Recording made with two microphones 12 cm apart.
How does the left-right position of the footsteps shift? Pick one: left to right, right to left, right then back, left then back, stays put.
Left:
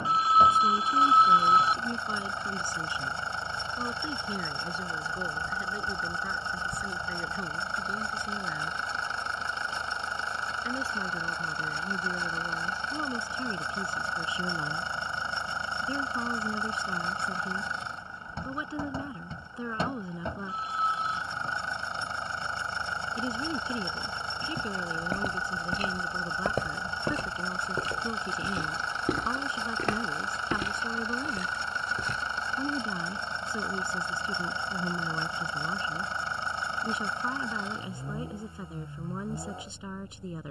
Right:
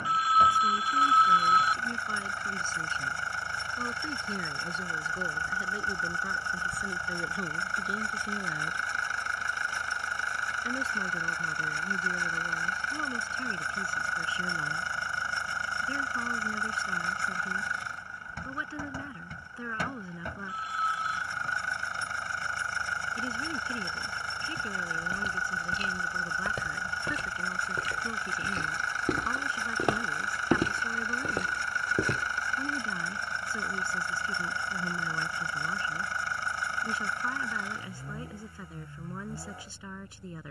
left to right.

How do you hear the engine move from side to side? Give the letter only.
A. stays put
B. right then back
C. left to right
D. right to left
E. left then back
A.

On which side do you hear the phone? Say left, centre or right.
left.